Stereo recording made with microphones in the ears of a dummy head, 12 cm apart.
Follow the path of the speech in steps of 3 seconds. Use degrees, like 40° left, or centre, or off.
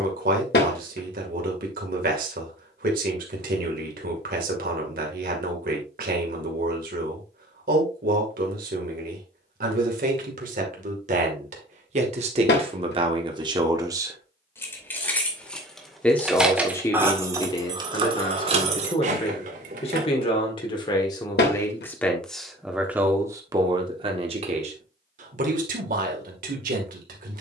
70° right, 70° right, 70° right, 60° right, 40° right, 20° left, 40° left, centre, 60° right.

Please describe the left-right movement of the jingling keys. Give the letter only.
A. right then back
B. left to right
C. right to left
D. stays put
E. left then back
B.